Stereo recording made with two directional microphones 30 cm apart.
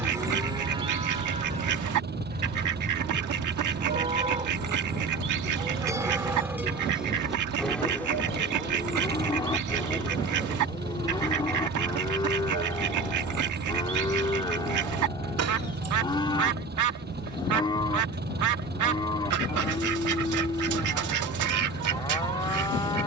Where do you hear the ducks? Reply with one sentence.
You can hear the ducks on the right.